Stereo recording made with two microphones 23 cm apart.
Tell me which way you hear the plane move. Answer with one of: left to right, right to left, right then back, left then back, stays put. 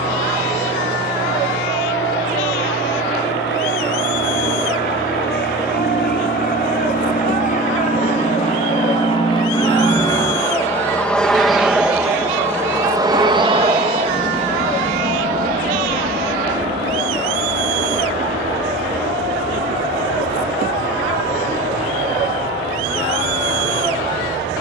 left to right.